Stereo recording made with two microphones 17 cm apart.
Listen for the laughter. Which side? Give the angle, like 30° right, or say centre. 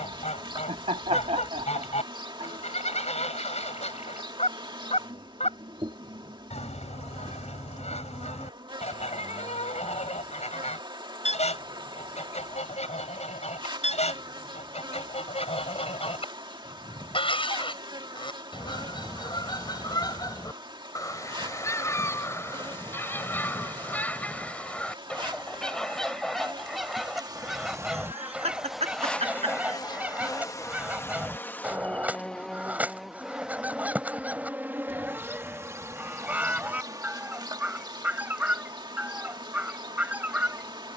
40° right.